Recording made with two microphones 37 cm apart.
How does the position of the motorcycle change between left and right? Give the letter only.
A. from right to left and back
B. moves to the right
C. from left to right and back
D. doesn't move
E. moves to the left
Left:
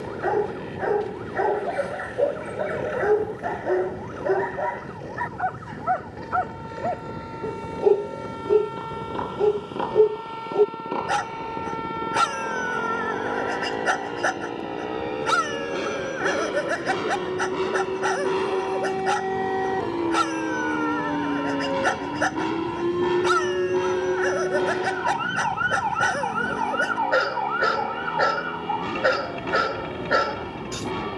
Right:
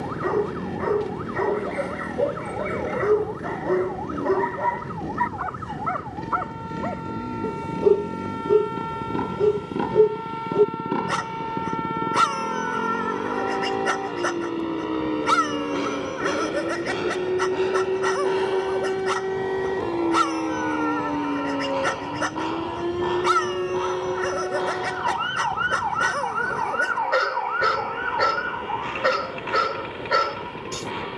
E.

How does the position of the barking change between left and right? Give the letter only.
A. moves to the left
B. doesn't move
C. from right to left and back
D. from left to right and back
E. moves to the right
B.